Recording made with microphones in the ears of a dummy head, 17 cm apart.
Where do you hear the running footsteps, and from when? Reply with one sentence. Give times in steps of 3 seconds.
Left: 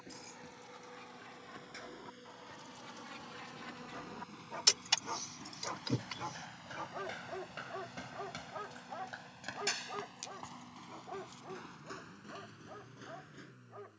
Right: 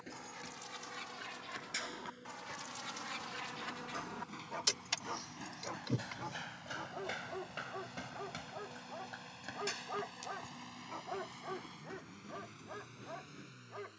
In this clip you hear the running footsteps on the right from 0 s, in the centre from 6 s and on the left from 9 s.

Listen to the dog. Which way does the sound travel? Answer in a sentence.
In this clip you hear the dog move from right to left and back again.